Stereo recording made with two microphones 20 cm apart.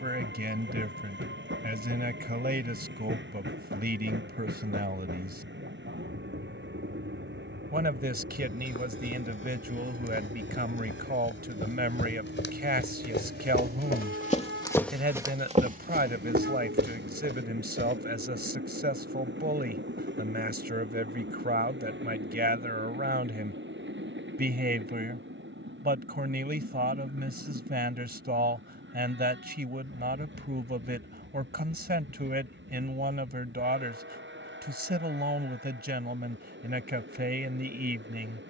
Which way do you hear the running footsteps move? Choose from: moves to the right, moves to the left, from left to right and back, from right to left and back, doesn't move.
moves to the right.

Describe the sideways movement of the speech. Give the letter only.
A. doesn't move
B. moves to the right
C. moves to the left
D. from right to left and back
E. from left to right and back
A.